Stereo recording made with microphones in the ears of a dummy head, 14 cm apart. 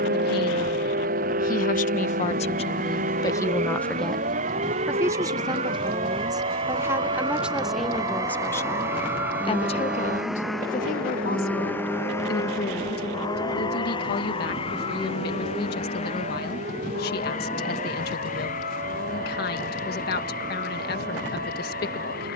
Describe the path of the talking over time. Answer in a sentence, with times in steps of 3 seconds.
You can hear the talking on the left from 0 s, in the centre from 3 s and on the left from 9 s.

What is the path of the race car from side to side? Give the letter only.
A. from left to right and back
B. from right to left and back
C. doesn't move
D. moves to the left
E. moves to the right
D.